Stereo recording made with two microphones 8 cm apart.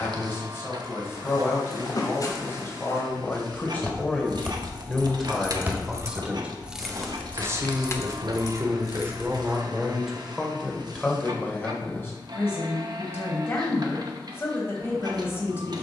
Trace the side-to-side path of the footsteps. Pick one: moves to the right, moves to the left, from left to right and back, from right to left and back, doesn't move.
moves to the right.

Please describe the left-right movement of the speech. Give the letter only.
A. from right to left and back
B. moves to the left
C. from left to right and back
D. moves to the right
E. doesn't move
C.